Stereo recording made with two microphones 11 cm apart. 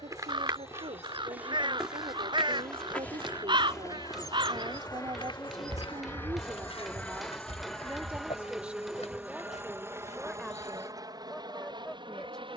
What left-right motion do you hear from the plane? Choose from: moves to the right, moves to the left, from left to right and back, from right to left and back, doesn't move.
moves to the right.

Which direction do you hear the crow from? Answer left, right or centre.
right.